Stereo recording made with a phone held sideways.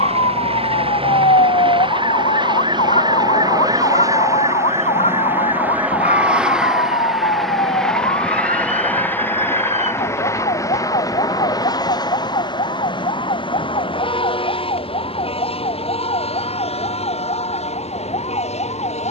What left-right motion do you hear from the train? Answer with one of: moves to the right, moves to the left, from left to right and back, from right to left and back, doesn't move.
moves to the left.